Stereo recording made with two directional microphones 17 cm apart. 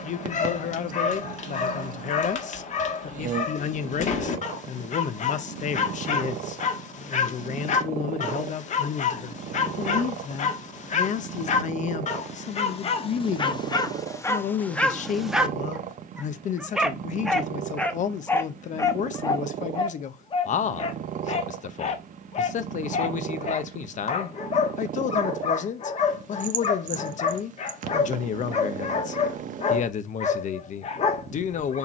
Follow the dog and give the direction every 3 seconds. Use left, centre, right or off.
left, left, left, left, left, centre, left, left, left, left, left.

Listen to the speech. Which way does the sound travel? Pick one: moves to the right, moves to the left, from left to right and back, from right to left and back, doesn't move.
doesn't move.